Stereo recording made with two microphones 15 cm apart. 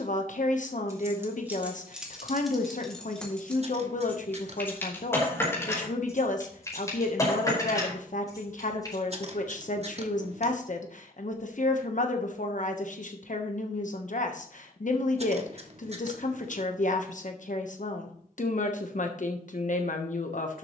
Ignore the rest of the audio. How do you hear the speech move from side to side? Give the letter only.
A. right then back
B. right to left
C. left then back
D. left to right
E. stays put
E.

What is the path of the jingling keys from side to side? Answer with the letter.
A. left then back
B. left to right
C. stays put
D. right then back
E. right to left
E.